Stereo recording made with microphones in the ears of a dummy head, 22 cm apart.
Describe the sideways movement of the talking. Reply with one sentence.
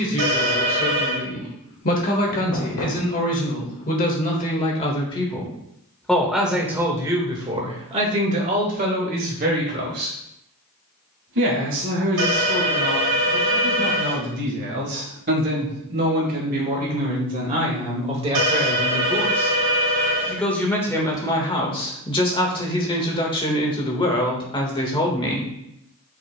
You can hear the talking go right and come back.